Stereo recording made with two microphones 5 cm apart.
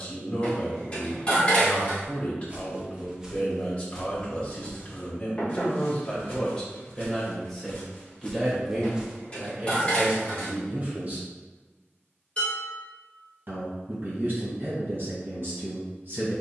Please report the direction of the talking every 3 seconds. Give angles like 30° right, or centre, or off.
30° left, 30° left, 10° left, 30° right, 50° right, 50° right.